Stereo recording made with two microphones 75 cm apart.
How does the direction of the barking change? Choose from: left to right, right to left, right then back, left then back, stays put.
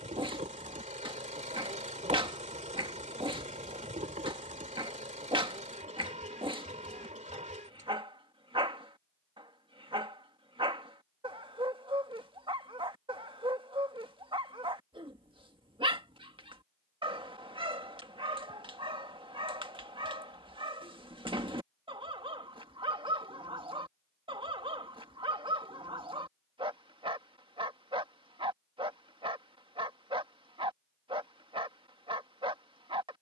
stays put.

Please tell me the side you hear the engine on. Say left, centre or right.
centre.